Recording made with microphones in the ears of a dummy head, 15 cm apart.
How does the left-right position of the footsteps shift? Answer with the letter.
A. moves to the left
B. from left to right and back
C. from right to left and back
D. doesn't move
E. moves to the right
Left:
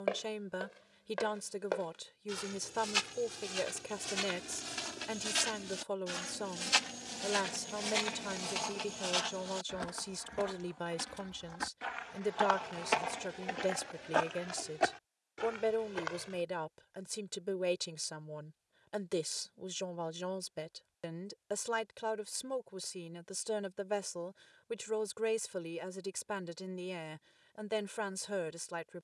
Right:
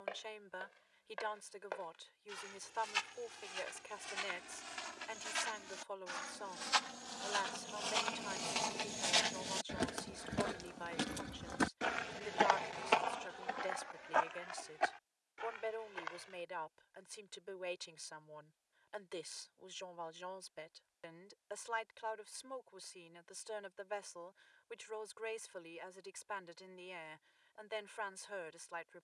B.